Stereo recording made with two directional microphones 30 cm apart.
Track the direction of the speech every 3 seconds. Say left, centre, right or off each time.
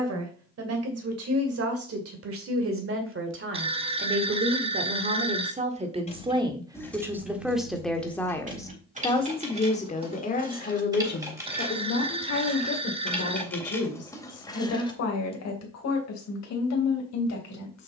right, right, centre, left, left, left.